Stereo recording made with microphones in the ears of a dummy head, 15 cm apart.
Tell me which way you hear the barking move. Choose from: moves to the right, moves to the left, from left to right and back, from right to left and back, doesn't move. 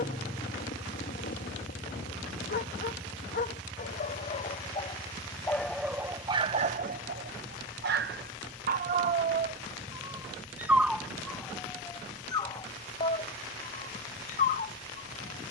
from left to right and back.